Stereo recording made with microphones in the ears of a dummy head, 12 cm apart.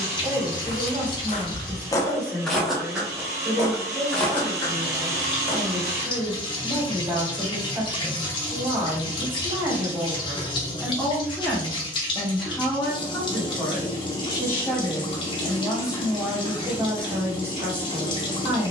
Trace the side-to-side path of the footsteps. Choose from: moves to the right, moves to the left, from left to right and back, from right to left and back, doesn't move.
from left to right and back.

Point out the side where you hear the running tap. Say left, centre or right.
left.